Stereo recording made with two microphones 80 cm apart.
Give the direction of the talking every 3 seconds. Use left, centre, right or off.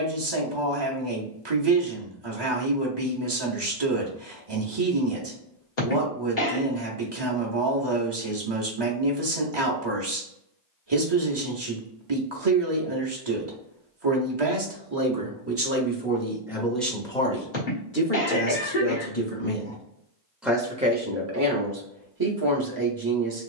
right, right, right, right, right, centre, centre, right.